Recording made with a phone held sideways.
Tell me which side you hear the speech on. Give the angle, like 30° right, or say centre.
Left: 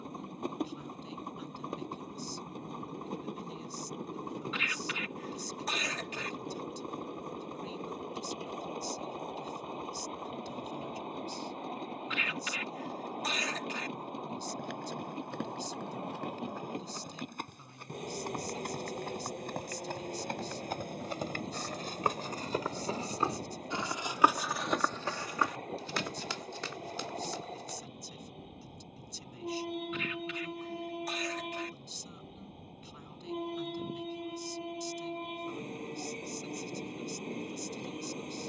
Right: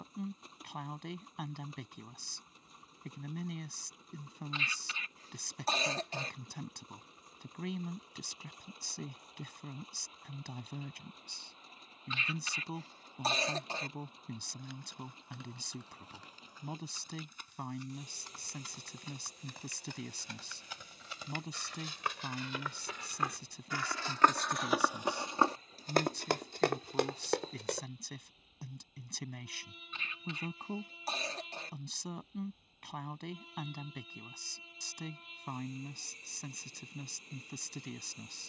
70° right.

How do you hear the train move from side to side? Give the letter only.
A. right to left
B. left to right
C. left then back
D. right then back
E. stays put
E.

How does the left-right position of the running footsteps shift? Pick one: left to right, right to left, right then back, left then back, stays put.
left to right.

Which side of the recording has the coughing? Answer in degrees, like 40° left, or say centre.
30° right.